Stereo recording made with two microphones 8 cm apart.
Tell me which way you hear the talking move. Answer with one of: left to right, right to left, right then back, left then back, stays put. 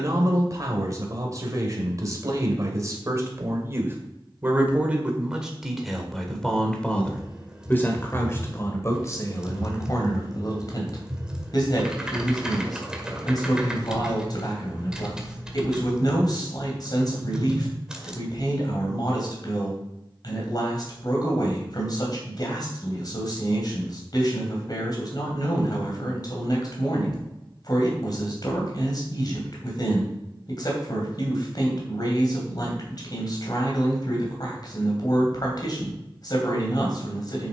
right to left.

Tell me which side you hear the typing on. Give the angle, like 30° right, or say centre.
10° right.